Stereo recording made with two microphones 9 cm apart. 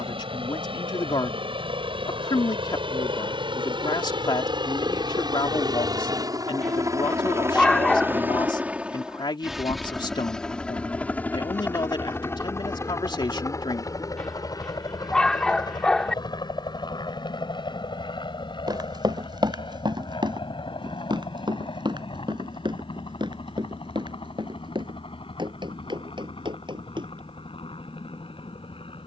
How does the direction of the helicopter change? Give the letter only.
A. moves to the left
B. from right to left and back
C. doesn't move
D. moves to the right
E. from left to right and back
A.